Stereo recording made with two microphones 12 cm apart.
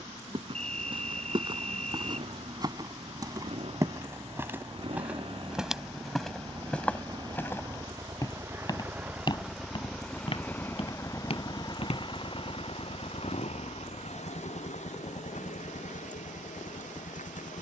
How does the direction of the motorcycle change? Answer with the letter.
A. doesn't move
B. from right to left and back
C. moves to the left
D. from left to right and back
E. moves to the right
C.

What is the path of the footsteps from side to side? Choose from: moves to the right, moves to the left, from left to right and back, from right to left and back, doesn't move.
moves to the left.